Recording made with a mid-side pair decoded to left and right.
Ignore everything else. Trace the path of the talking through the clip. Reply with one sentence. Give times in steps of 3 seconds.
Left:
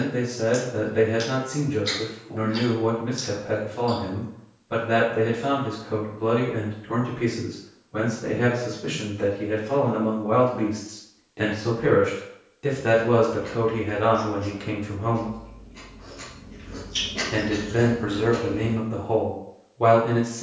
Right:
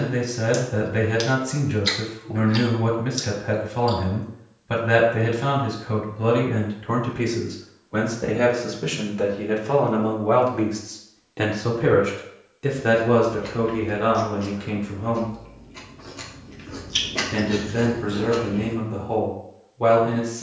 In this clip you hear the talking on the right from 0 s and in the centre from 12 s.